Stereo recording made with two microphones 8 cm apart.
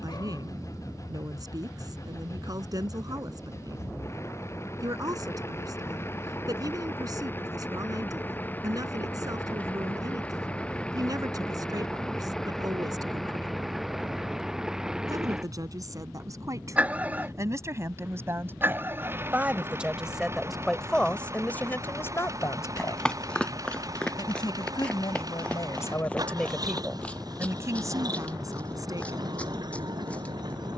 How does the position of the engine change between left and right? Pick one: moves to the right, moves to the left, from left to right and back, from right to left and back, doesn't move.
moves to the right.